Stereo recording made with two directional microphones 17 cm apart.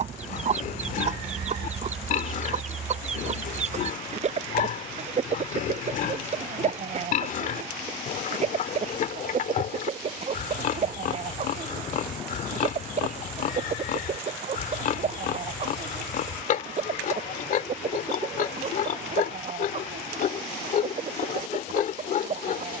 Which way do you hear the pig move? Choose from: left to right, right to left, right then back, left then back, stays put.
stays put.